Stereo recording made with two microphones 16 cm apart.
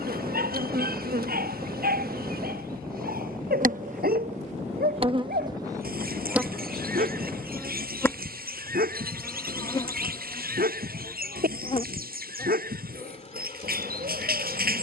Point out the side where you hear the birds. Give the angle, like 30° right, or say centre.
70° right.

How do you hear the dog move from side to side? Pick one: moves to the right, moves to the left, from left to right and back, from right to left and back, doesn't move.
doesn't move.